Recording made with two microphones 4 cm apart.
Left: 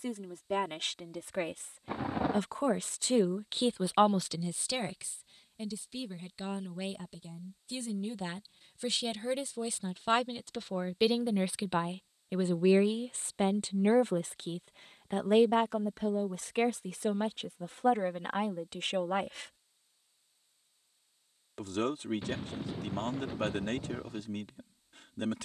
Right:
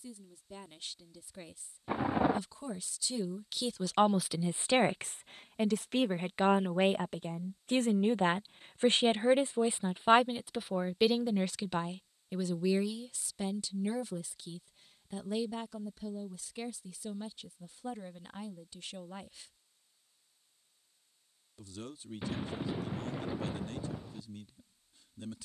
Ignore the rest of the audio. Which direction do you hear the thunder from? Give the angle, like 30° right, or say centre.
10° right.